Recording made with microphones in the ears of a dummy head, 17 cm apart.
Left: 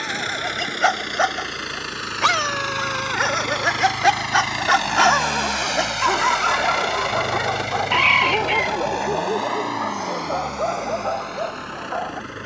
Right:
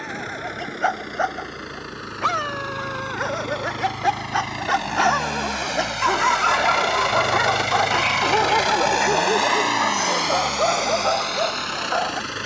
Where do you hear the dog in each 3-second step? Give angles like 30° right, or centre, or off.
70° left, 40° left, 20° right, 60° right.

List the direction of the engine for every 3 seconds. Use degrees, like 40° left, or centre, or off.
60° left, 30° left, 20° right, 60° right.